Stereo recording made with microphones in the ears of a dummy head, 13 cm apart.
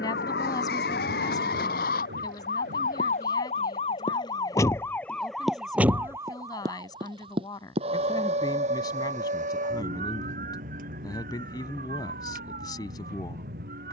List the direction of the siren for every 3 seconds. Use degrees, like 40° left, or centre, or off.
70° left, 20° left, 30° right, 60° right, 60° right.